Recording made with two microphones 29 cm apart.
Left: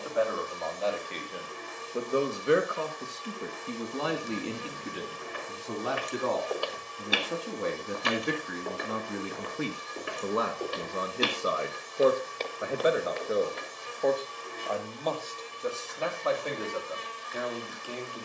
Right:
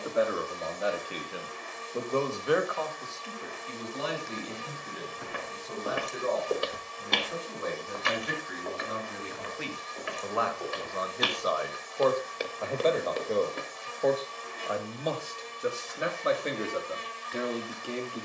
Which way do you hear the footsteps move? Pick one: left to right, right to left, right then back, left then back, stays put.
left then back.